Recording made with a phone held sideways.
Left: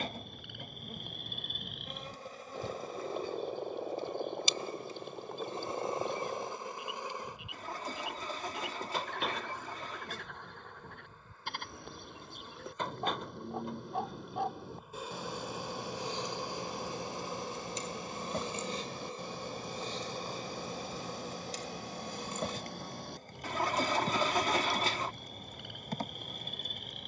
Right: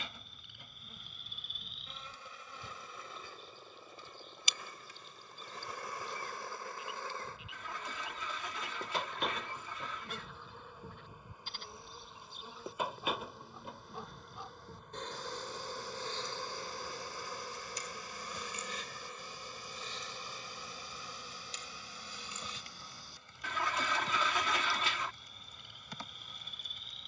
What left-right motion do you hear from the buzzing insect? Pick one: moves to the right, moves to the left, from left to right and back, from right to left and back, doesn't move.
from left to right and back.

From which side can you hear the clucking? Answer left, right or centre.
left.